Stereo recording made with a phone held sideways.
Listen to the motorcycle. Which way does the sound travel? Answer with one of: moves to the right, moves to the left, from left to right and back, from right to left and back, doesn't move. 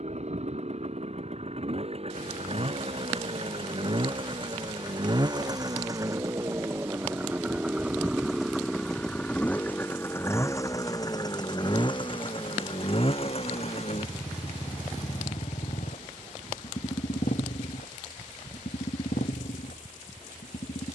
moves to the left.